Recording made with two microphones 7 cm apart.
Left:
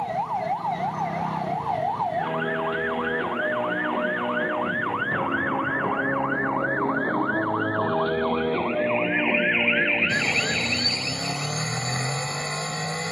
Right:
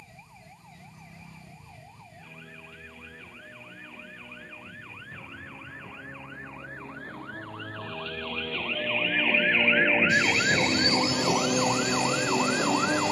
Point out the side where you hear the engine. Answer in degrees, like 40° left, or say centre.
40° left.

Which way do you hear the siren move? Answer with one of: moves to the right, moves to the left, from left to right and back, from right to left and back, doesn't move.
moves to the right.